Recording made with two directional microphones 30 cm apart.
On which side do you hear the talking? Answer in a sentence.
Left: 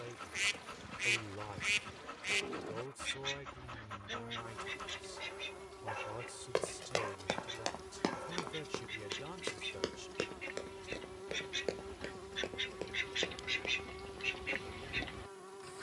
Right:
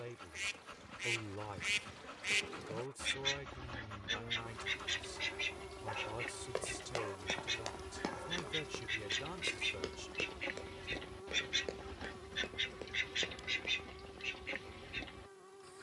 You can hear the talking in the centre.